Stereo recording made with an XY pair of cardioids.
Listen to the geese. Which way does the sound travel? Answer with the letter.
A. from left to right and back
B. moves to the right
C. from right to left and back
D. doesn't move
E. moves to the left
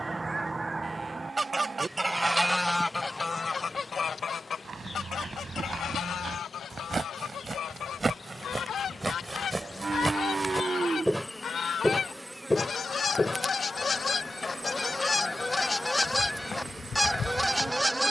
C.